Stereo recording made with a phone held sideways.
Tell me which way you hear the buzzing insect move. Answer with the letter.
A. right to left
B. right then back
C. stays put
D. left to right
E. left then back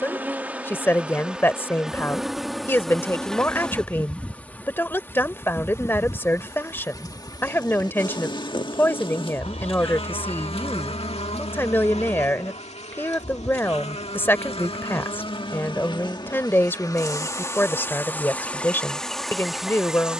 E.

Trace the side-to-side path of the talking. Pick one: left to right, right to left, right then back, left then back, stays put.
stays put.